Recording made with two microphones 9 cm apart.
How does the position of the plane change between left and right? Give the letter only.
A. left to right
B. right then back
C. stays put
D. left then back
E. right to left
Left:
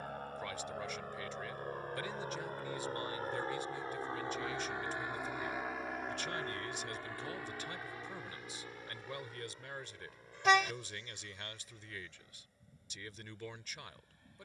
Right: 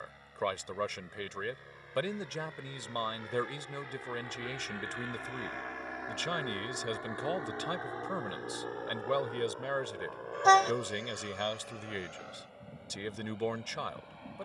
A.